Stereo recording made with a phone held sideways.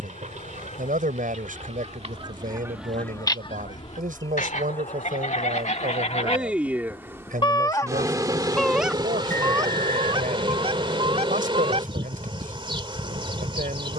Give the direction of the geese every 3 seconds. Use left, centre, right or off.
right, left, left, right, right.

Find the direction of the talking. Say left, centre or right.
right.